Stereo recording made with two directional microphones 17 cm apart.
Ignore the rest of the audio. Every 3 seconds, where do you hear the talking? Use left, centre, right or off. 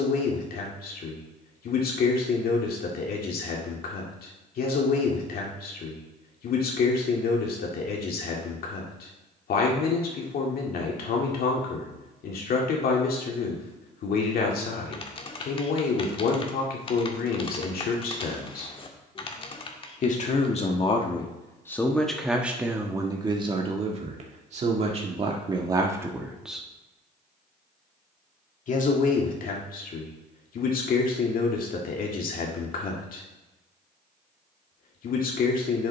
left, left, left, left, left, left, left, centre, right, left, left, left.